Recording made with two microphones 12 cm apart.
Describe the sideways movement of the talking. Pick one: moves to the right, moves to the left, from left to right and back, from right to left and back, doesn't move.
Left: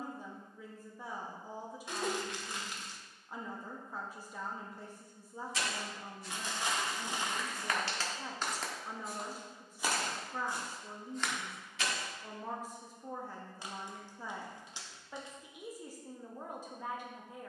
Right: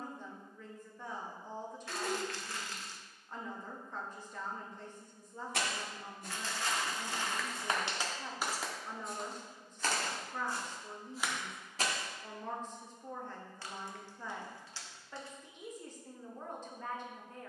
doesn't move.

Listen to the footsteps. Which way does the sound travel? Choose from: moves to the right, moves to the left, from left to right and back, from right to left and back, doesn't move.
from right to left and back.